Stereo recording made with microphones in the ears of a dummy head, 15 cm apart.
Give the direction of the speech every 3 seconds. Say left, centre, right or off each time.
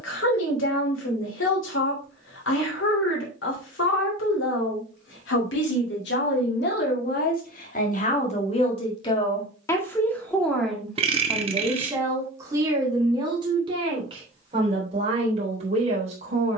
left, left, left, centre, right, right.